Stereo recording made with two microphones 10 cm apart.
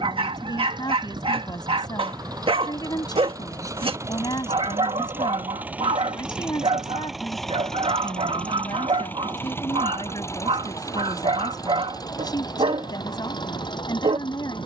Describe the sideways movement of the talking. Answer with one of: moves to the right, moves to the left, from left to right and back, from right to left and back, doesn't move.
doesn't move.